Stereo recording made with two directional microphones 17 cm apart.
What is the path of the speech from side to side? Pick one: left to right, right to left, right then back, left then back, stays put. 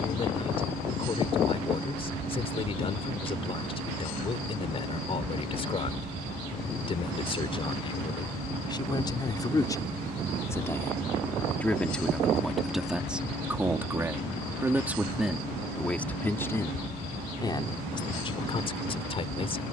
right then back.